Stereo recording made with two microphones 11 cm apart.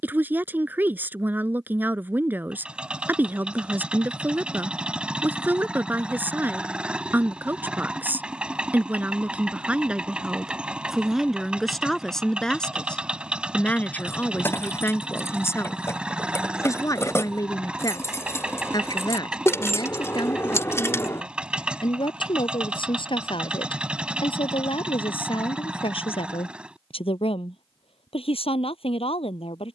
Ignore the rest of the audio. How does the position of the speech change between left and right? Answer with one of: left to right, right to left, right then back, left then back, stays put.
right to left.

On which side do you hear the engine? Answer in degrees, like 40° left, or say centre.
10° right.